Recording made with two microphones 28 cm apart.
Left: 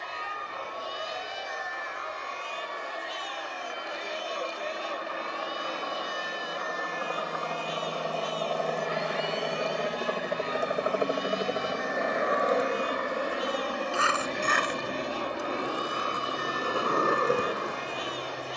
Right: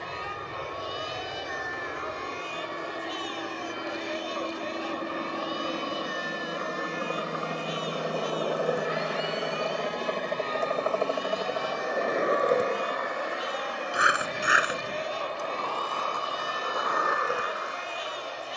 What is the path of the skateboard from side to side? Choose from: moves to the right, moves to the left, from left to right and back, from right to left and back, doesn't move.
moves to the left.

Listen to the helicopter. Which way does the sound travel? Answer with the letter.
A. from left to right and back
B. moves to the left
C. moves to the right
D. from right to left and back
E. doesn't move
B.